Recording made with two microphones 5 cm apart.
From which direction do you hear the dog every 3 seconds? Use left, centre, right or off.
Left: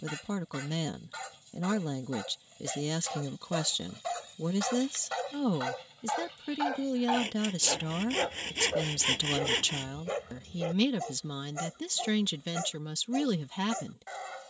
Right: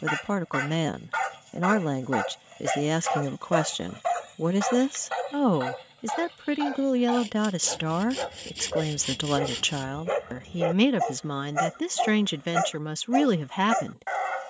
right, right, centre, right, right.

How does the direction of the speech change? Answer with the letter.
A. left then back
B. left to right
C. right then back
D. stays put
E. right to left
D.